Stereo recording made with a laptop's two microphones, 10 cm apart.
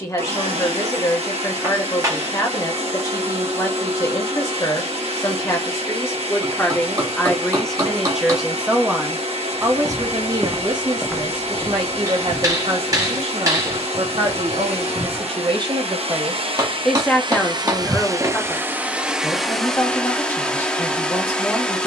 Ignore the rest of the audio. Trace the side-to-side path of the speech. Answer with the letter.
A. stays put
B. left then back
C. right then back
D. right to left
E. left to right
C.